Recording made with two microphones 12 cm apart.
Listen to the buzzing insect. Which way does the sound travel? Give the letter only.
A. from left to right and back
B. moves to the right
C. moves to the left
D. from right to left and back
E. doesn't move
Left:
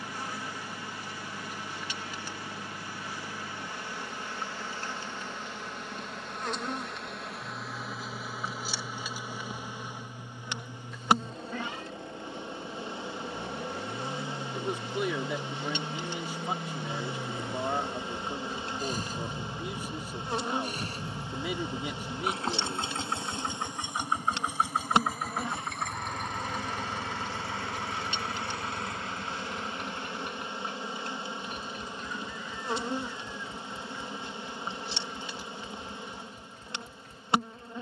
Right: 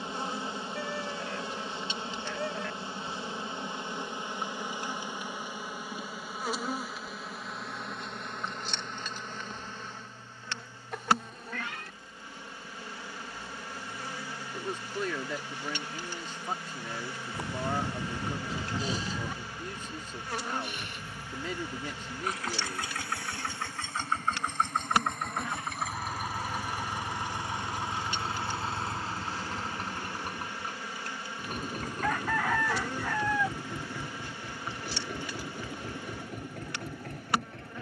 C.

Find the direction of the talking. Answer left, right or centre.
centre.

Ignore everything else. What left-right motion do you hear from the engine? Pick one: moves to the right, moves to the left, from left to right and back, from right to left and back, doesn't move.
moves to the right.